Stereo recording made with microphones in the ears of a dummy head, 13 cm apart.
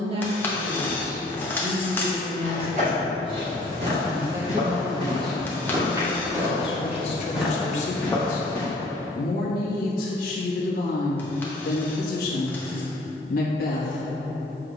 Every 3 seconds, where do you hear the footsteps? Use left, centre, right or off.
right, right, centre, off, off.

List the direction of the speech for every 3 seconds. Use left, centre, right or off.
right, centre, left, left, left.